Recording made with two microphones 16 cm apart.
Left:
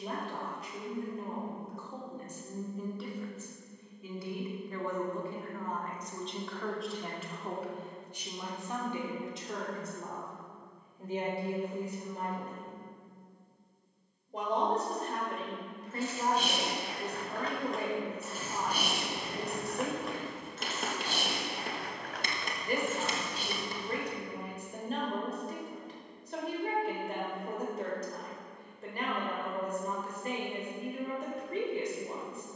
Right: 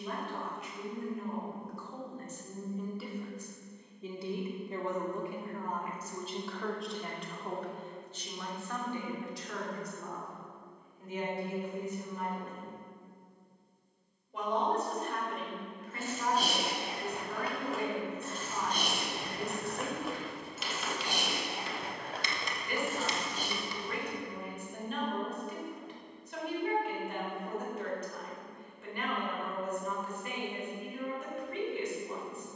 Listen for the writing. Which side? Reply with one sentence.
In this clip you hear the writing on the left.